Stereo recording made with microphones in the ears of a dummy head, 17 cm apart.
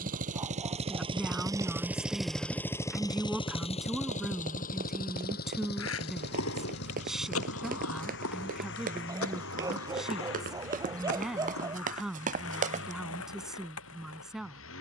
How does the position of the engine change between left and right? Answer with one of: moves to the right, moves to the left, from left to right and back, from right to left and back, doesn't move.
moves to the left.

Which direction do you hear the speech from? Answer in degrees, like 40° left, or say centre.
centre.